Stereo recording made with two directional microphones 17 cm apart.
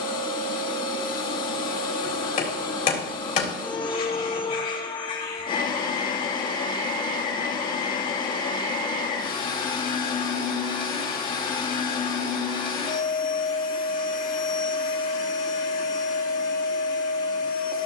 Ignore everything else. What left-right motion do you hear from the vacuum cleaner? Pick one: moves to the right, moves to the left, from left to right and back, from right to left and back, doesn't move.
doesn't move.